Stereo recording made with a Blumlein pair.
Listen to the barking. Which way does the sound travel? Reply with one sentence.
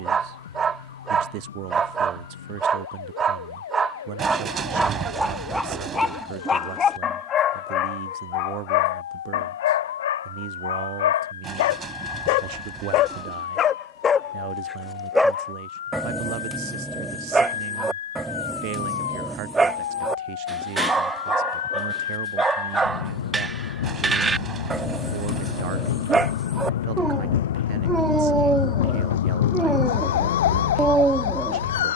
In this clip you hear the barking go left and come back.